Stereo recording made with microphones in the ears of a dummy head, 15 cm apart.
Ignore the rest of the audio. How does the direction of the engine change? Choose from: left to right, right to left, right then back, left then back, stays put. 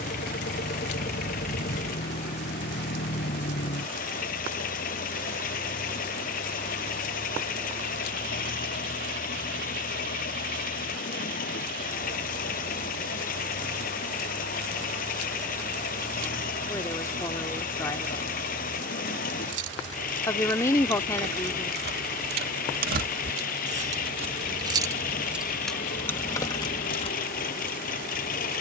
stays put.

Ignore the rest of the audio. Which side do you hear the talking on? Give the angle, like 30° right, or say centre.
20° left.